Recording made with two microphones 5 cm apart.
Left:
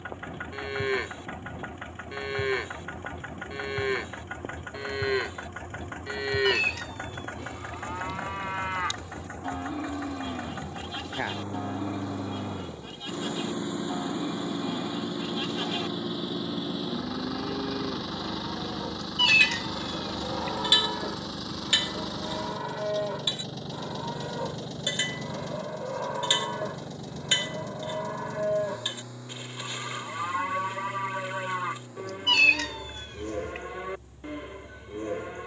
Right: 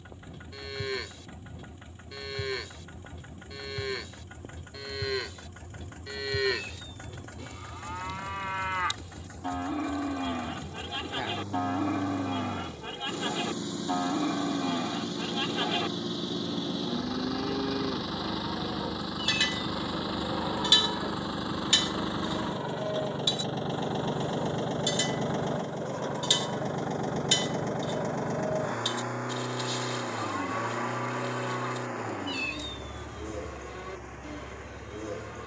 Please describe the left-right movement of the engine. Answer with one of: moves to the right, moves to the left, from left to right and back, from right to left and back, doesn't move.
moves to the right.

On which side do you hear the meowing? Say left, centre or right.
left.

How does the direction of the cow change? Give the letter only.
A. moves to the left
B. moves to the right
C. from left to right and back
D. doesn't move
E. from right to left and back
C.